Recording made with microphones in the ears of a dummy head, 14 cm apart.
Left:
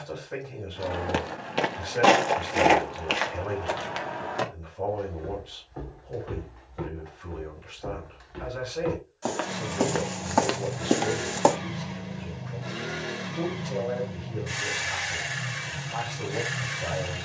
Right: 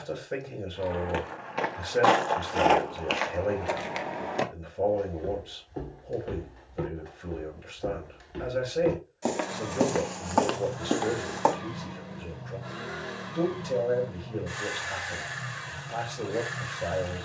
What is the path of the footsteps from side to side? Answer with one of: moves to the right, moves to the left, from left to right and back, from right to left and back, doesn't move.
from left to right and back.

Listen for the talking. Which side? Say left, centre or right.
right.